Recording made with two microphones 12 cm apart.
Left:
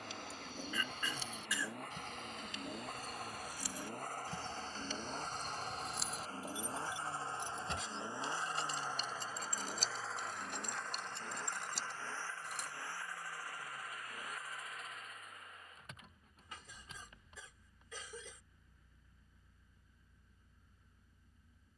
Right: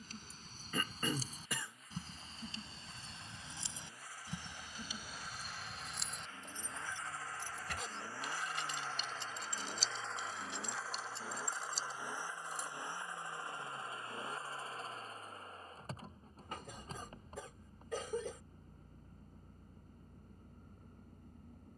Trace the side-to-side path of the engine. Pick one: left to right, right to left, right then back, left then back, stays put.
left to right.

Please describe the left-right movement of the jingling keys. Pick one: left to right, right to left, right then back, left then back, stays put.
right to left.